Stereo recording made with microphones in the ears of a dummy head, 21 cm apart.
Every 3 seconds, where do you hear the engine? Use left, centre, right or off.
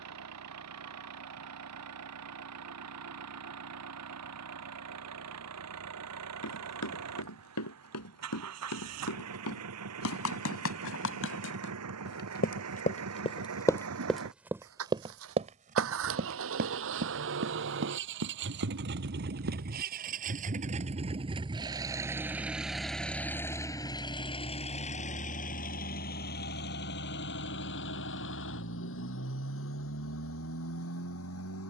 right, right, right, right, right, right, right, centre, left, left, left.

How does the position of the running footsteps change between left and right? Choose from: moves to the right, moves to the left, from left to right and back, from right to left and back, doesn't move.
moves to the right.